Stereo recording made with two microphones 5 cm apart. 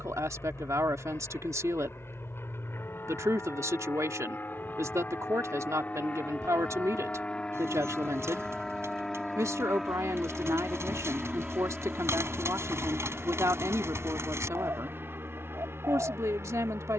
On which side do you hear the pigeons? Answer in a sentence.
You can hear the pigeons on the right.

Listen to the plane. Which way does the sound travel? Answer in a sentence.
You can hear the plane travel towards the right.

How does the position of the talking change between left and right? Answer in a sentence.
In this clip you hear the talking stay in one place.